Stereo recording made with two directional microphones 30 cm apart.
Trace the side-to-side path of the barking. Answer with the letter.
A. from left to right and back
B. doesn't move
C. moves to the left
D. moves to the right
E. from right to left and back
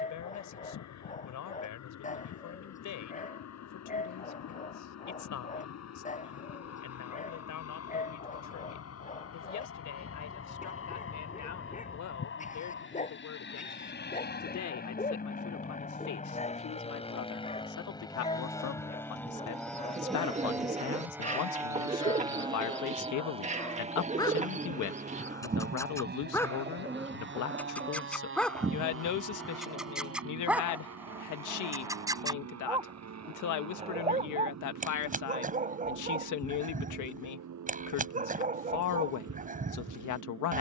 D.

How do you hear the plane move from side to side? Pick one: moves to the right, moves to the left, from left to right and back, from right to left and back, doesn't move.
moves to the right.